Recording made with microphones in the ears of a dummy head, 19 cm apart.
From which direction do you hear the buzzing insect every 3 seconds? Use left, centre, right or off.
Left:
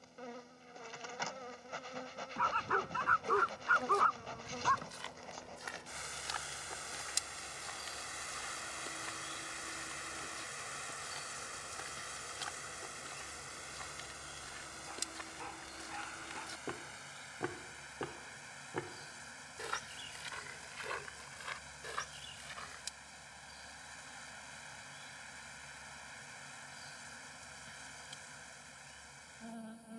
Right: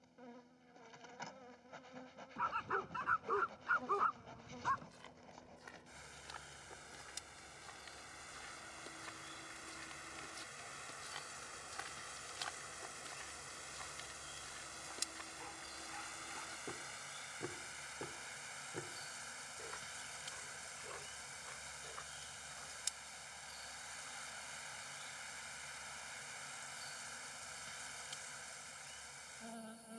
left, left, left, centre, centre, right, right, right, right, right.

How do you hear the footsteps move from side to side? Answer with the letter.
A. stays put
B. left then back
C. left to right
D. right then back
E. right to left
D.